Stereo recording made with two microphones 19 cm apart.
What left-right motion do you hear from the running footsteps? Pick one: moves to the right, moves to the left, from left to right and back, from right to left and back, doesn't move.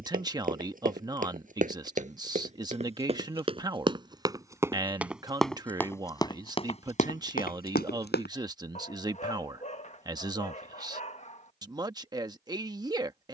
moves to the left.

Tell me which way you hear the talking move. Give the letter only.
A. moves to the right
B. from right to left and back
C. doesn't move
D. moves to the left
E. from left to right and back
C.